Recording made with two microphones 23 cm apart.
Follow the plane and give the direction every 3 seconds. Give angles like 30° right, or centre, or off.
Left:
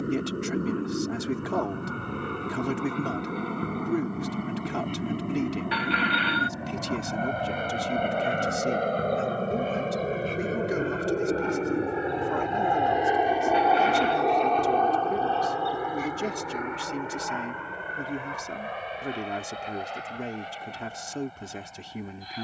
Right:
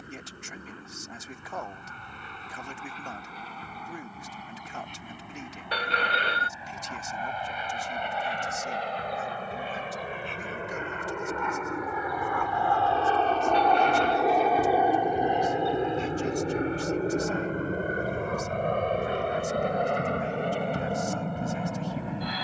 70° left, 70° left, 60° left, 40° left, 10° left, 30° right, 50° right, 60° right.